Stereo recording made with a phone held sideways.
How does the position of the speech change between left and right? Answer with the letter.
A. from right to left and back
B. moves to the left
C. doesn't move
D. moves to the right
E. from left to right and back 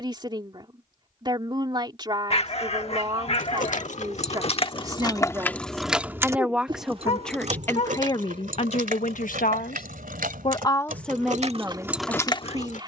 A.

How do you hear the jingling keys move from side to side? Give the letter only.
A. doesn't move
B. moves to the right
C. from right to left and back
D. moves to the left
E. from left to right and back
E.